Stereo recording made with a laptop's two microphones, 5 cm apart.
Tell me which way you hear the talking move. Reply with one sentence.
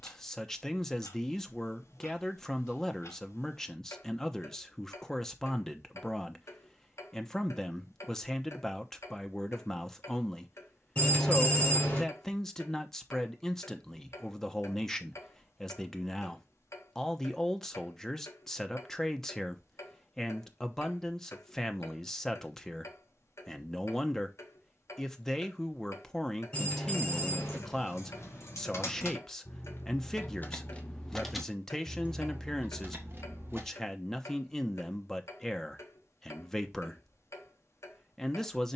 You can hear the talking stay in one place.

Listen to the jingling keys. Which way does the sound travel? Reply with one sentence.
You can hear the jingling keys move from left to right.